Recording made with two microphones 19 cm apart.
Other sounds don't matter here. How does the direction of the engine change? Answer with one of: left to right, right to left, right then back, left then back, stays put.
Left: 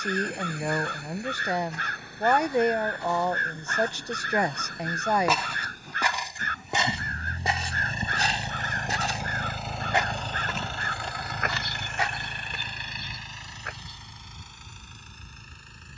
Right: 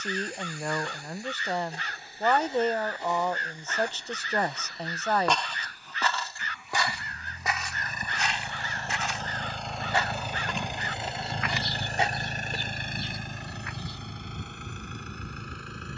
left to right.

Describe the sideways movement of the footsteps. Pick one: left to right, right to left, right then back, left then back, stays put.
left then back.